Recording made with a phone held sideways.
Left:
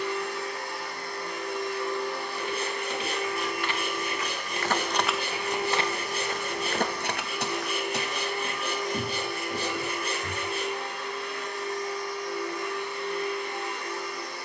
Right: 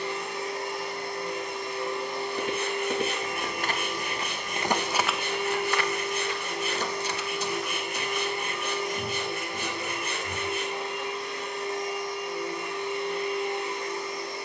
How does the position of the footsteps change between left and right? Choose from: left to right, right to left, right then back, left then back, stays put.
right to left.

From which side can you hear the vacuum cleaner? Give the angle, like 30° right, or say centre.
20° right.